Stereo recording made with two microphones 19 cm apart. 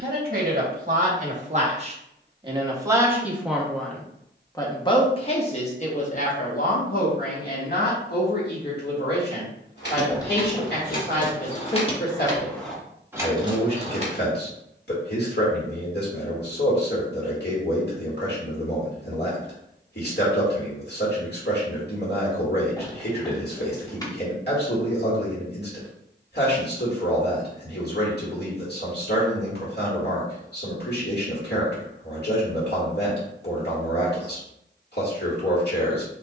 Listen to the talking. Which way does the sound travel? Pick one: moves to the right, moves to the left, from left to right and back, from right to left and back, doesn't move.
moves to the left.